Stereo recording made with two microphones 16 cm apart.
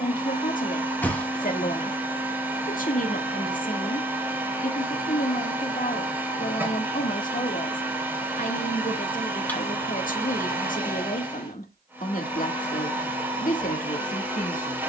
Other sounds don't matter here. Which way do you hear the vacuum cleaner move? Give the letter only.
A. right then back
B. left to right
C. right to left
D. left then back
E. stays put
E.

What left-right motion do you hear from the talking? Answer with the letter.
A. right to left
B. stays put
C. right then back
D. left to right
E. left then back
B.